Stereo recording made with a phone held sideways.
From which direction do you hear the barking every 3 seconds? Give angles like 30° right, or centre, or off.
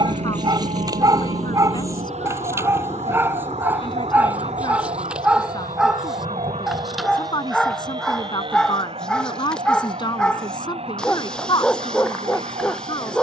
30° right, 10° right, centre, 10° left, 10° left.